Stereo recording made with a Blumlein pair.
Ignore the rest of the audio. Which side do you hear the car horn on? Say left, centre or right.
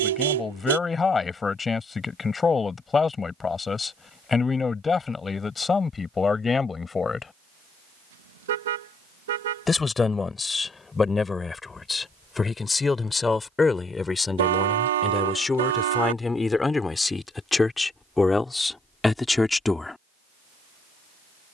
right.